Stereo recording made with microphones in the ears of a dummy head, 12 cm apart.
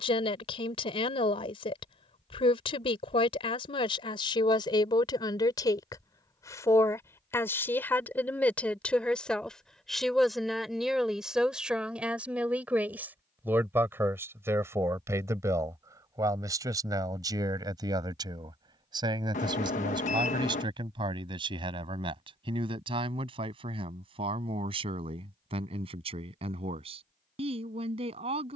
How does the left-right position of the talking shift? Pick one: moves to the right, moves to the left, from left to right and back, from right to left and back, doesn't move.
moves to the right.